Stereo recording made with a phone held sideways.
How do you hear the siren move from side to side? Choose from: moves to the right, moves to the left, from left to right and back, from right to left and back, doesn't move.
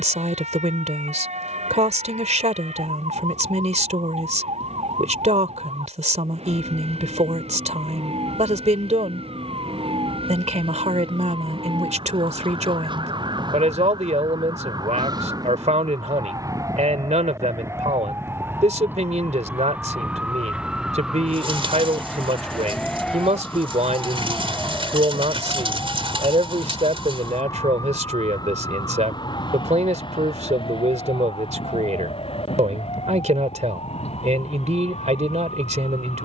moves to the left.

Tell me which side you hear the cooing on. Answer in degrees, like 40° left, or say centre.
40° right.